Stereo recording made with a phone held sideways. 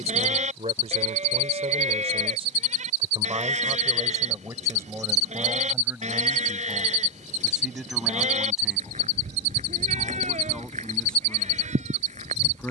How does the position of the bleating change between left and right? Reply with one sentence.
You can hear the bleating stay put.